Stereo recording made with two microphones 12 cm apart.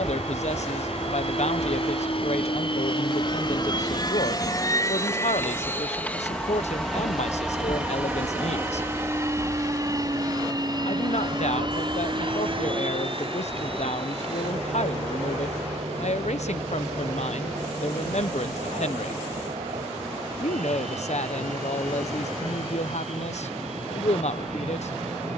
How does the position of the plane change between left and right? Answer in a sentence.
You can hear the plane travel towards the right.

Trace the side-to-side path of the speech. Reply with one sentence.
You can hear the speech stay in one place.